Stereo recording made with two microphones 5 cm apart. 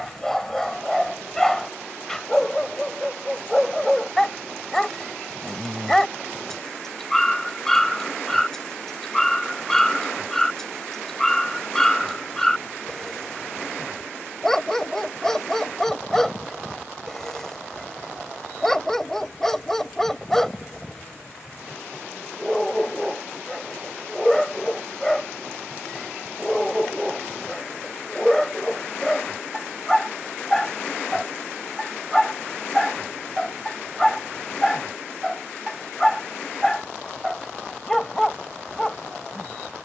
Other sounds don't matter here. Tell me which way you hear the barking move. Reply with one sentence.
You can hear the barking stay put.